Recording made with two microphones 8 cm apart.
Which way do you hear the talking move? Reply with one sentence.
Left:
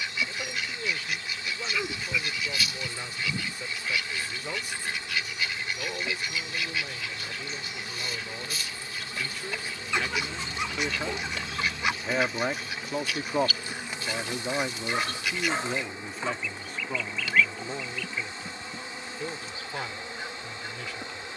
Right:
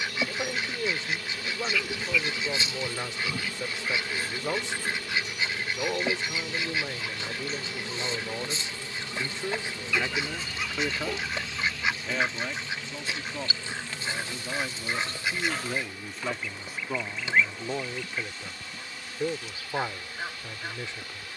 You can hear the talking go left and come back.